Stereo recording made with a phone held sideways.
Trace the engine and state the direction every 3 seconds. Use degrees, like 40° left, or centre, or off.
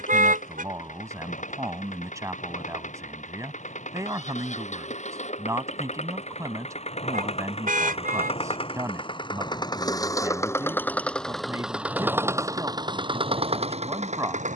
60° left, 60° left, 50° left, 20° left, 40° right.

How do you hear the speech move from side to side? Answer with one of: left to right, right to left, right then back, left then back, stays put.
stays put.